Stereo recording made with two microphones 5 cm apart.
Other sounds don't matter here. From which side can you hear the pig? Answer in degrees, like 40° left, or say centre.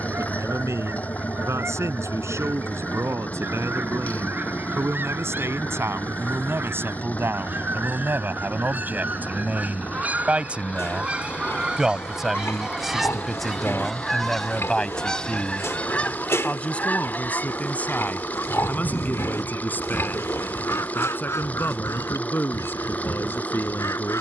60° left.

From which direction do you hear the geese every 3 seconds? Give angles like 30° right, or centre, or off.
50° right, 50° right, 40° right, 30° right, 10° right, 30° left, 60° left, 70° left.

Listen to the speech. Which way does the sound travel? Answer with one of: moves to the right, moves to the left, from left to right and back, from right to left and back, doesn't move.
moves to the left.